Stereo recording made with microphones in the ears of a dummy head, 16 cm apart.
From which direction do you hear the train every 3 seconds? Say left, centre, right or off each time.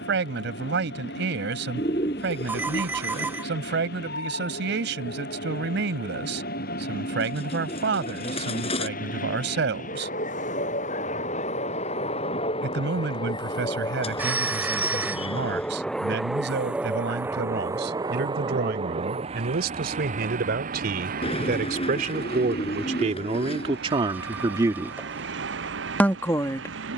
left, left, left, left, left, centre, right, right, right.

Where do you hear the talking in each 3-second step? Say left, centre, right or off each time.
right, right, right, right, right, right, right, right, centre.